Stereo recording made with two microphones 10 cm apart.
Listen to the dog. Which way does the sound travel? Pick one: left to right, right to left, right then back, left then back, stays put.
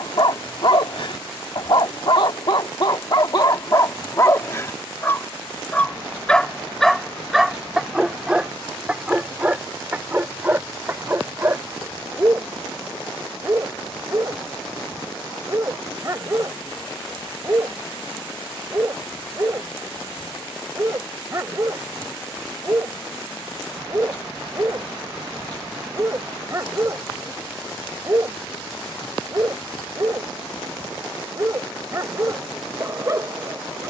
left to right.